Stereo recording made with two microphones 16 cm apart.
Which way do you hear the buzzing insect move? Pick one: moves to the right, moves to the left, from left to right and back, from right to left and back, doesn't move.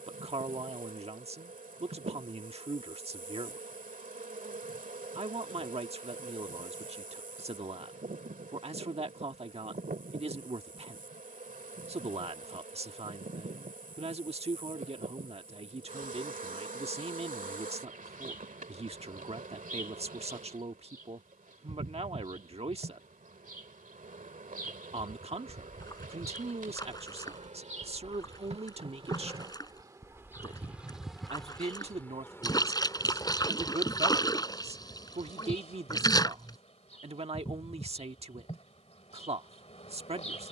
moves to the left.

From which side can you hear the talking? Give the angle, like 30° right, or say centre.
40° right.